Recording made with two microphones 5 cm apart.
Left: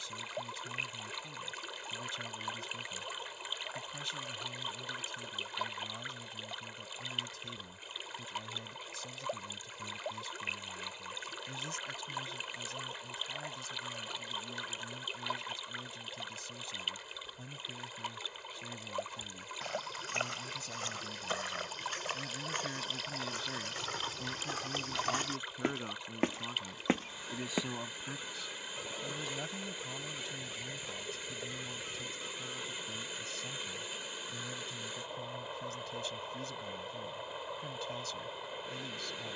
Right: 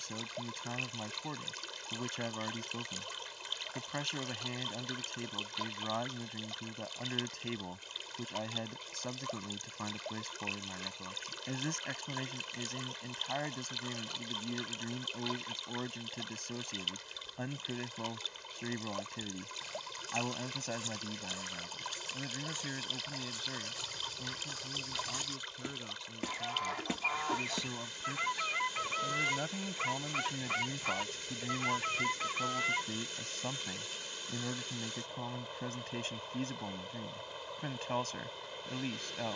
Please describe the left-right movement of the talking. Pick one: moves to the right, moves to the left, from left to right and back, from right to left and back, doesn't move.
from right to left and back.